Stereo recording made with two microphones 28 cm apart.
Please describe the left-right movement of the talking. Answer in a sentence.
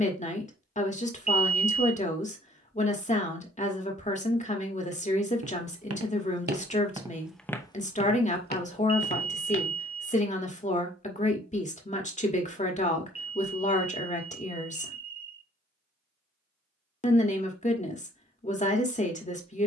You can hear the talking stay put.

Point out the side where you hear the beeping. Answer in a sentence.
You can hear the beeping on the right.